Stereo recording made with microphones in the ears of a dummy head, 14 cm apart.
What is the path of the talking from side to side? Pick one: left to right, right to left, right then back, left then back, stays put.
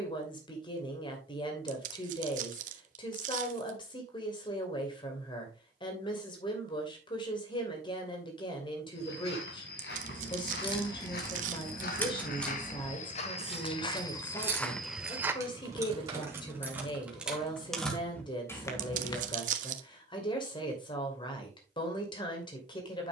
stays put.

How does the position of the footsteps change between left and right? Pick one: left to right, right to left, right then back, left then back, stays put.
left to right.